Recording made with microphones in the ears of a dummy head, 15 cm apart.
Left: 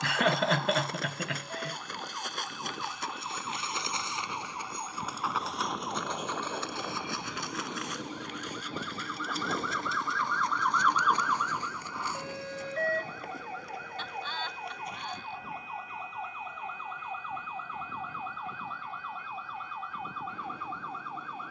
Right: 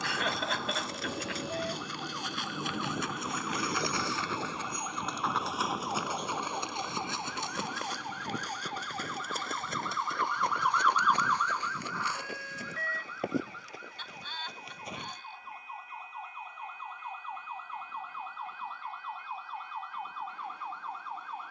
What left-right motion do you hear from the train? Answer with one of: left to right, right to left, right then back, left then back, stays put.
right to left.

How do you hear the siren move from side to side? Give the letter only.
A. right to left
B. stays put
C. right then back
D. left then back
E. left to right
A.